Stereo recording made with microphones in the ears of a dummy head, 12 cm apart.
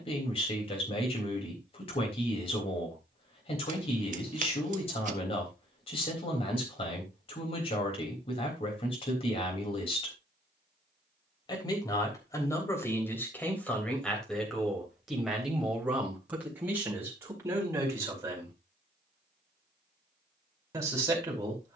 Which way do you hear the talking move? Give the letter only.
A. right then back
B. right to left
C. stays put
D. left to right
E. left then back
D.